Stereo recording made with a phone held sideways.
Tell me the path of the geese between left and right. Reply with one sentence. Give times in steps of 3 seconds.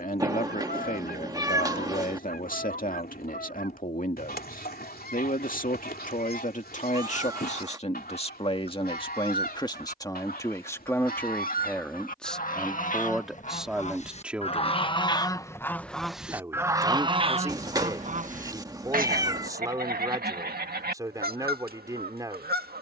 You can hear the geese on the left from 0 s, in the centre from 15 s and on the right from 18 s.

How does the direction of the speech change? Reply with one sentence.
You can hear the speech move to the right.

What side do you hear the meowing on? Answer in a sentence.
You can hear the meowing on the right.